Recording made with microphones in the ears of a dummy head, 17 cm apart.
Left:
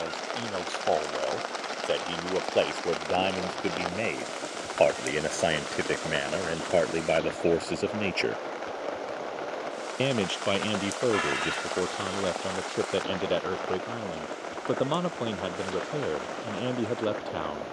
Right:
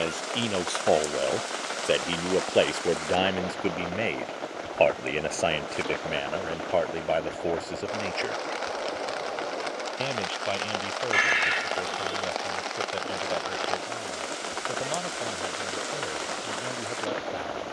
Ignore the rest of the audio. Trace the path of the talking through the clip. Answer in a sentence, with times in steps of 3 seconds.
In this clip you hear the talking on the right from 0 s, in the centre from 3 s and on the left from 6 s.